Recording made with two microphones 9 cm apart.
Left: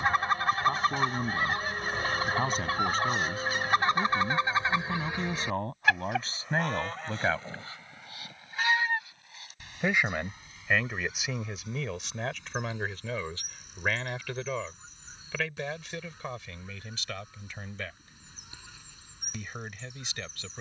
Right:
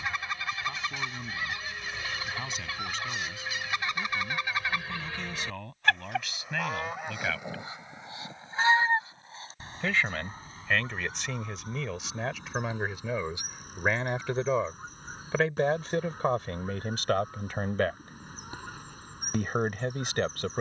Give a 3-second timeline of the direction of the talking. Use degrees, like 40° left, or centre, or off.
40° left, 40° left, 30° left, 10° left, 20° right, 50° right, 50° right.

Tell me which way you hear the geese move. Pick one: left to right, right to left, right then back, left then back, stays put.
left to right.